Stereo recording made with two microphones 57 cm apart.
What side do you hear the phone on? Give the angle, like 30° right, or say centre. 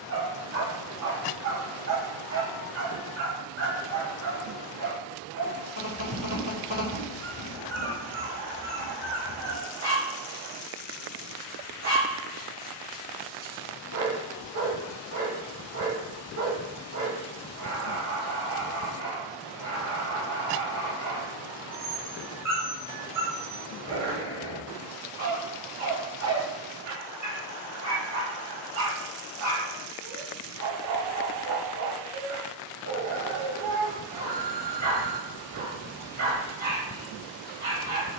50° right.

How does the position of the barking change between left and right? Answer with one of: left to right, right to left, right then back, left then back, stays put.
stays put.